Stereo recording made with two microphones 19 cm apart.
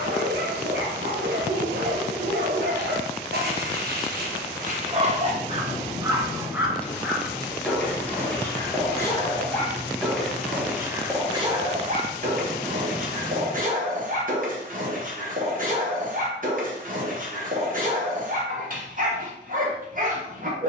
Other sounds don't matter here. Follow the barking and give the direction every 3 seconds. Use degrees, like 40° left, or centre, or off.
60° right, 50° right, centre, 10° right, 50° right, 50° right, 50° right.